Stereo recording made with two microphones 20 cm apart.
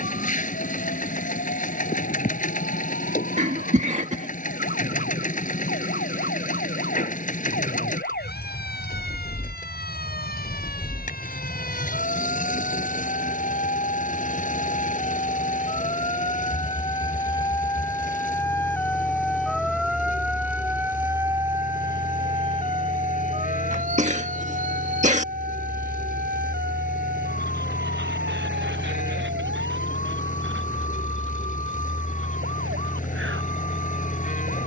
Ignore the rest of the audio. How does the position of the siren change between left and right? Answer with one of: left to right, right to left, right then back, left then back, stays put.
left to right.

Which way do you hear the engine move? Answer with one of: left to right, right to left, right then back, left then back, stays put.
stays put.